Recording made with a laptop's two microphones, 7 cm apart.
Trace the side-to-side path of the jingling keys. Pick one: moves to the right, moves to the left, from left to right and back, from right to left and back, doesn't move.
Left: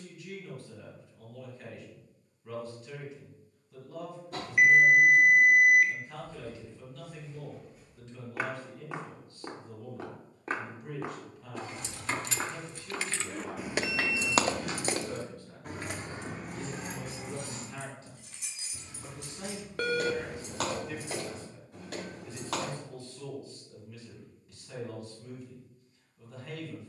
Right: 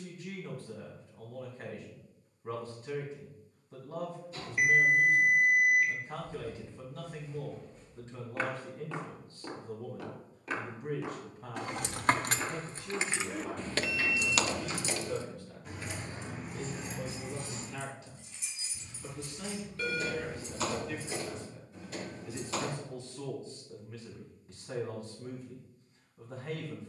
moves to the left.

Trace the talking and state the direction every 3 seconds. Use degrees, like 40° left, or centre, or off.
40° right, 40° right, 40° right, 40° right, centre, 50° left, 20° left, 20° right, 30° right.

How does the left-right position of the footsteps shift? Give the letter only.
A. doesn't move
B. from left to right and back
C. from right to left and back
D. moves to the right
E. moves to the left
E.